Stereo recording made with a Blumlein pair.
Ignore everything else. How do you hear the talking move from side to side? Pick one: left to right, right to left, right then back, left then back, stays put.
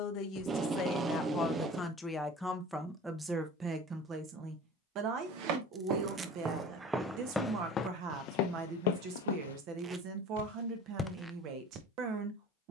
left to right.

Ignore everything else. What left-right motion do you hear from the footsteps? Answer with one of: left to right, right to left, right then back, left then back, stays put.
left then back.